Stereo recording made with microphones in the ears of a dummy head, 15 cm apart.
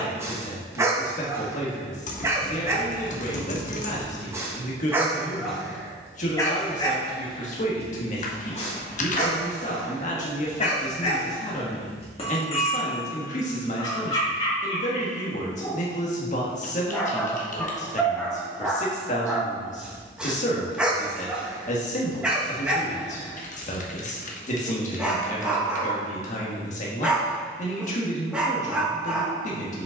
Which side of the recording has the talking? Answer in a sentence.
In this clip you hear the talking on the left.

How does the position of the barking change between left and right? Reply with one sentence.
You can hear the barking go left and come back.